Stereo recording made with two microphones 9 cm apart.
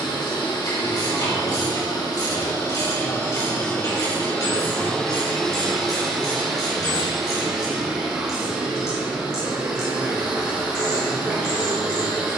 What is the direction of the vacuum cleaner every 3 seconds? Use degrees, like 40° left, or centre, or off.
50° left, 20° left, 10° right, 10° right.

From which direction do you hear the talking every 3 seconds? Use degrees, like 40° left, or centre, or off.
60° left, 40° left, 10° right, 40° right.